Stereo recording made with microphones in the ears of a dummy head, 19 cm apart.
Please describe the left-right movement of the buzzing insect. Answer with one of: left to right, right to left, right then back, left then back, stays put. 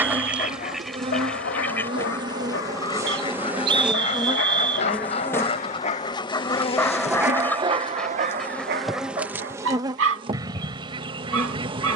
left then back.